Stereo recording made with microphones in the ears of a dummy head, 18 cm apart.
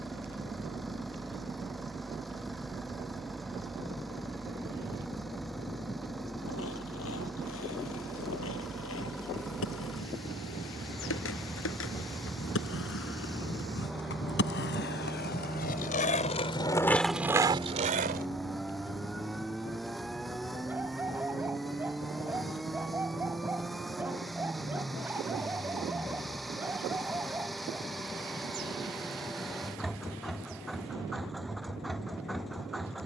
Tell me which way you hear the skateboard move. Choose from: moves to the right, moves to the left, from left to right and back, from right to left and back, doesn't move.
moves to the right.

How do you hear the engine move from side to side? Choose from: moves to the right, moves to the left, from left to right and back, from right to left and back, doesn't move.
doesn't move.